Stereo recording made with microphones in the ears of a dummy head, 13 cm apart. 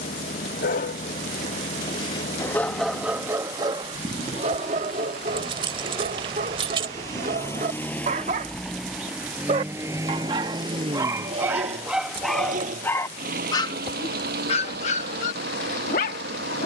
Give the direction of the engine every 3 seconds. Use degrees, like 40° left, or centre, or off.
50° left, 40° left, 10° left, 30° right, 60° right, 80° right.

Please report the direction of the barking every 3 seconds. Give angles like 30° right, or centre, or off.
30° left, 40° right, 50° right, 20° right, 20° left, 60° left.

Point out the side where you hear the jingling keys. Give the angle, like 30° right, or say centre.
40° right.